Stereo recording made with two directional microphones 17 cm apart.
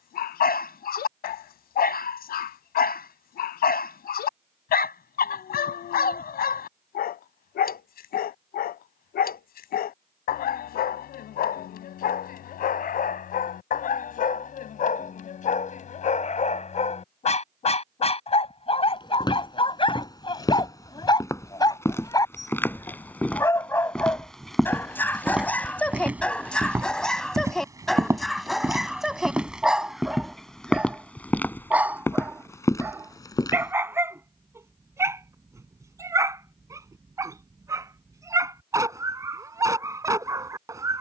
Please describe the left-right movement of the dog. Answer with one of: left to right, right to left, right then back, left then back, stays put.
left to right.